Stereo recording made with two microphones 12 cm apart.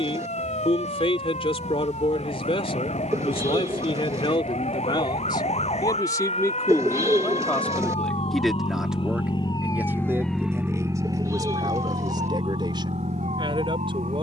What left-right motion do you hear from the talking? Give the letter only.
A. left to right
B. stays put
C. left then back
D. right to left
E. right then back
A.